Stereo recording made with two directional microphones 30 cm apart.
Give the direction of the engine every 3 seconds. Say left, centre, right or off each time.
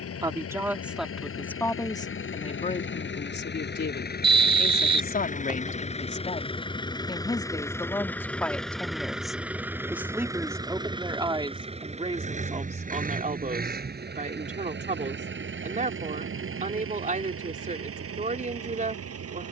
left, left, centre, centre, right, right, right.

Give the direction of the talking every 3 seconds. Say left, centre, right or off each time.
centre, left, centre, centre, right, right, right.